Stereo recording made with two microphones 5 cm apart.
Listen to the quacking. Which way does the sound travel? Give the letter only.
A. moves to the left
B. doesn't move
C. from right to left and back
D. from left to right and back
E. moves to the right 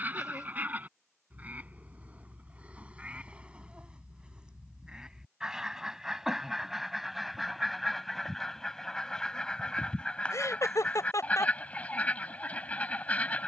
A.